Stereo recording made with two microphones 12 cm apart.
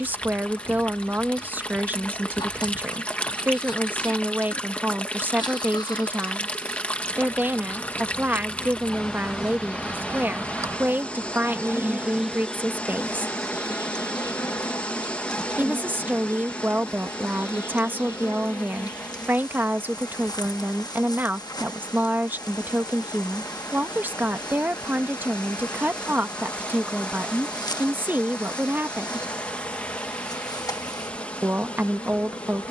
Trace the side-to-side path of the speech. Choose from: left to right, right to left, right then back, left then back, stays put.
stays put.